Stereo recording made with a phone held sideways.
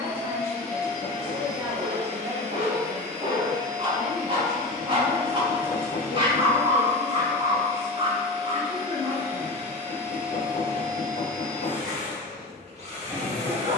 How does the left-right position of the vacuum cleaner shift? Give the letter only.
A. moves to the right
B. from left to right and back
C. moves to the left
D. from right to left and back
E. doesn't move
E.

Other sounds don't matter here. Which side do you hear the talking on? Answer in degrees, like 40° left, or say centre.
20° right.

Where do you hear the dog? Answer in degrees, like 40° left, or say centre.
30° right.